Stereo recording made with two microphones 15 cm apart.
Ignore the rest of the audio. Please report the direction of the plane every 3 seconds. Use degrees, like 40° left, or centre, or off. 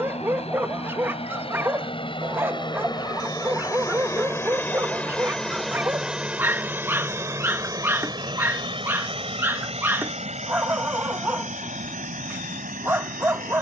40° left, 20° left, 20° right, 50° right, 60° right.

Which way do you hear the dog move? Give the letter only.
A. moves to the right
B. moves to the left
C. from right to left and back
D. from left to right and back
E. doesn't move
E.